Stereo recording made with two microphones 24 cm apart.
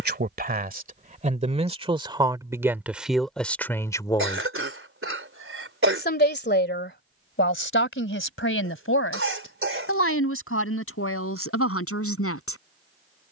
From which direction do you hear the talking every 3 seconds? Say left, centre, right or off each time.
right, centre, left, left, left.